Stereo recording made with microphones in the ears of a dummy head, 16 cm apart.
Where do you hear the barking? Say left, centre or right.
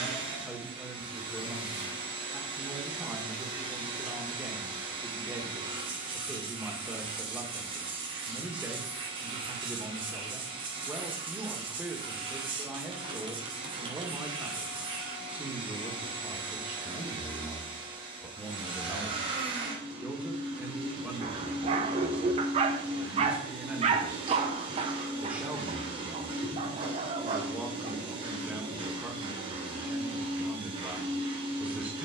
right.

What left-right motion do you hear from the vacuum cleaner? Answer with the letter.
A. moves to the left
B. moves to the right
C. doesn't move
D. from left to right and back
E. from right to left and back
C.